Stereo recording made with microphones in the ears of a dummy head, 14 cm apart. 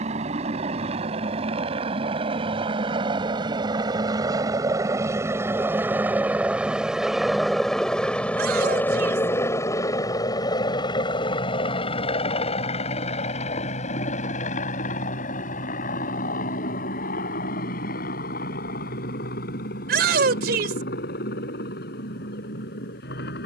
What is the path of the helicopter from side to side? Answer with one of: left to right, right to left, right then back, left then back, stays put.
right to left.